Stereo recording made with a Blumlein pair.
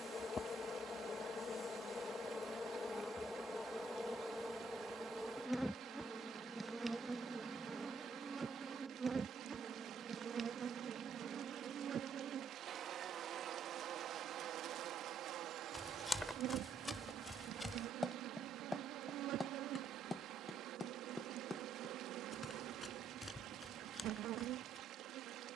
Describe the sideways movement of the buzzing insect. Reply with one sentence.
In this clip you hear the buzzing insect move to the right.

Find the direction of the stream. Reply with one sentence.
You can hear the stream on the right.